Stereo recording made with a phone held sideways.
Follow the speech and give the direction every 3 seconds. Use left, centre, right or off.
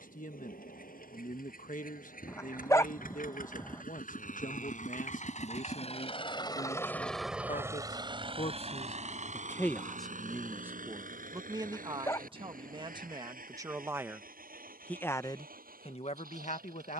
left, left, left, centre, right, left.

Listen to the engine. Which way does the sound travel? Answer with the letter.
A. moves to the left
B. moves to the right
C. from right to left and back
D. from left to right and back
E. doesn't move
B.